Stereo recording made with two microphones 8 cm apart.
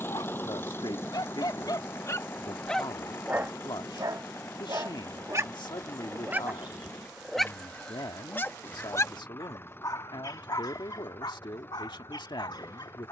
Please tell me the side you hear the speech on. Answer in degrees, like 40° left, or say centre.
80° left.